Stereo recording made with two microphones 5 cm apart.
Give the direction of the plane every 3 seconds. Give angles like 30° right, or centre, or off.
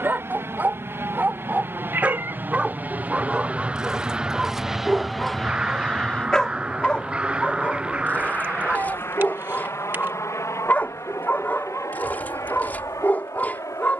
50° right, 10° right, 40° left, 60° left, 70° left.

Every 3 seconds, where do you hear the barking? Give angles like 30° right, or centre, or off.
30° right, 10° right, 30° left, 40° left, 40° left.